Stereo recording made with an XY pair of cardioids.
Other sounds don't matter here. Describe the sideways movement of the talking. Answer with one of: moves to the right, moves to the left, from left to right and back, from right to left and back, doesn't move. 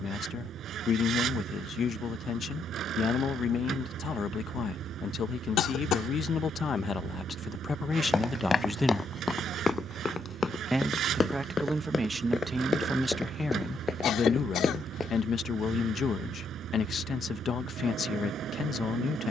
from left to right and back.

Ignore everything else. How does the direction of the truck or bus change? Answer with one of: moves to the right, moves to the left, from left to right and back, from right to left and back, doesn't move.
doesn't move.